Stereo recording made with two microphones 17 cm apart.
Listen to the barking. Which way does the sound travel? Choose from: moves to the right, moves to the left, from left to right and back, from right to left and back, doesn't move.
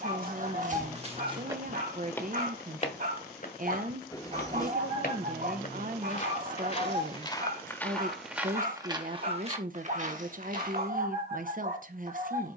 doesn't move.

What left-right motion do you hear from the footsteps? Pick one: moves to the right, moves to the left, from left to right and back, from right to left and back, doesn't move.
from right to left and back.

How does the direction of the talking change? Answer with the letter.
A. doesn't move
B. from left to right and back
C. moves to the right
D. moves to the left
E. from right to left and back
A.